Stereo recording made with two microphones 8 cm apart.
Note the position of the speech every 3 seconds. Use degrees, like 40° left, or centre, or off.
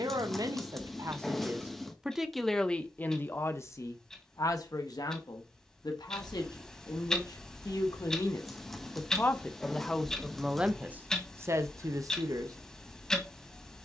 20° right, 40° left, 50° left, 10° right, 50° right.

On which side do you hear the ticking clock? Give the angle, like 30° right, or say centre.
10° left.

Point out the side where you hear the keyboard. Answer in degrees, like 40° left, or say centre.
centre.